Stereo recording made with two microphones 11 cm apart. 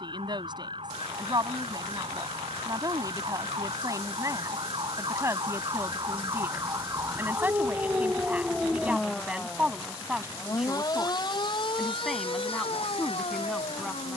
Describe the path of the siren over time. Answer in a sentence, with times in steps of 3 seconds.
In this clip you hear the siren on the right from 0 s and on the left from 9 s.